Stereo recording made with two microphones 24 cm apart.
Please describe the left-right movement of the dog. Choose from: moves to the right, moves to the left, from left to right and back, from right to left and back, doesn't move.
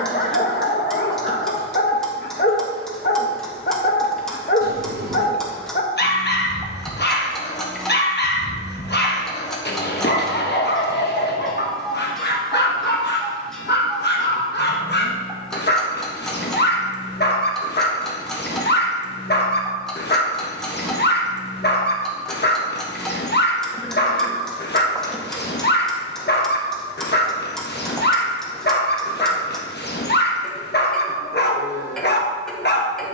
doesn't move.